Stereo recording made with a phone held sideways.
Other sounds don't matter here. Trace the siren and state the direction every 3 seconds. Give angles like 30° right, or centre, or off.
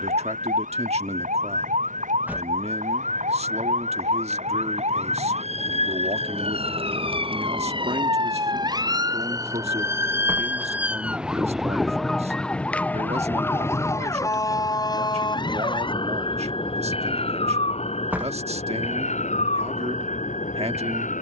60° right, 50° right, 40° right, 10° right, 10° left, 40° left, 50° left.